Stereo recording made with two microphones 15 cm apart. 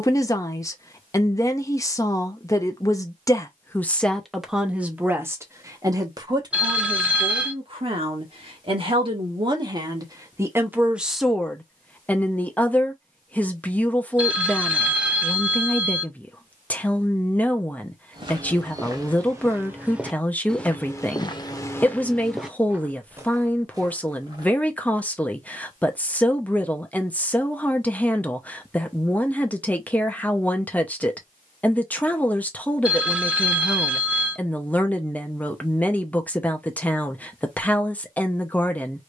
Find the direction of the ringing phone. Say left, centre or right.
centre.